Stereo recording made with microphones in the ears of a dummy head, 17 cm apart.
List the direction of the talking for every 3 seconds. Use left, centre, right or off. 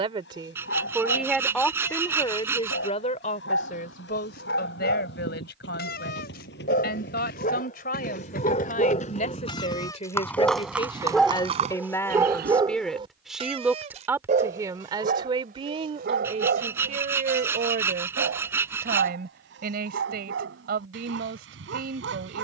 centre, left, left, left, centre, right, right, right.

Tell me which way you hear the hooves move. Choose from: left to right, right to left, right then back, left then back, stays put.
left to right.